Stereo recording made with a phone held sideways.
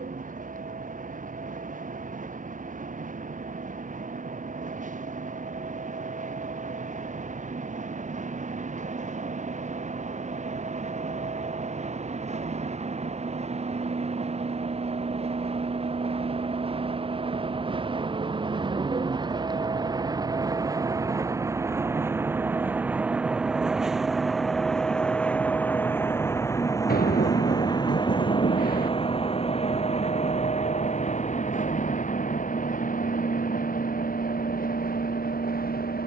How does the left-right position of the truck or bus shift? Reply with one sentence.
You can hear the truck or bus go from the right side to the left.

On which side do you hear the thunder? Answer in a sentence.
In this clip you hear the thunder on the left.